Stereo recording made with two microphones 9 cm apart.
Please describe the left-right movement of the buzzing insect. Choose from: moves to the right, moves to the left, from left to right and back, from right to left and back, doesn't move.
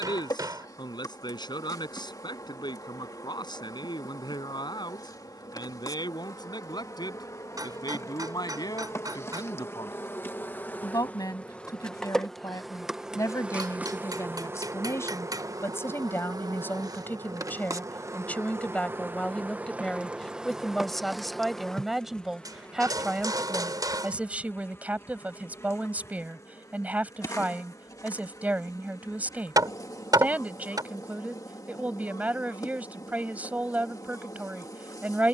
from left to right and back.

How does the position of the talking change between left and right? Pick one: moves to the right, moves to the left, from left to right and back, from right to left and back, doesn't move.
moves to the right.